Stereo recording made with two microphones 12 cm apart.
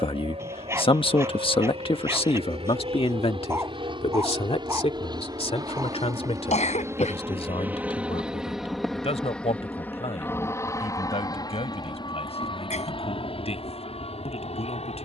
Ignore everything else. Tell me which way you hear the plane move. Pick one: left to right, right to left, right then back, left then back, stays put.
right to left.